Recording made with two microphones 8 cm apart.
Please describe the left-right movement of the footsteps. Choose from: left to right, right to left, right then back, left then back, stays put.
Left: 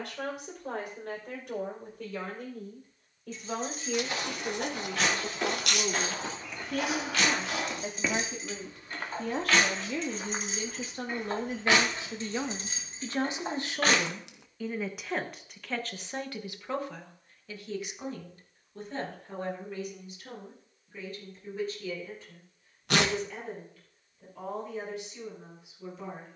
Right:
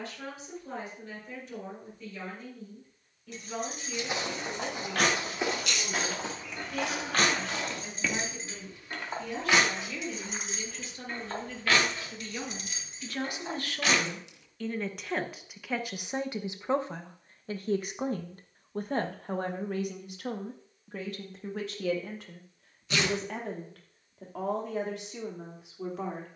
right to left.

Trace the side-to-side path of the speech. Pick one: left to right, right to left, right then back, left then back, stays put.
left to right.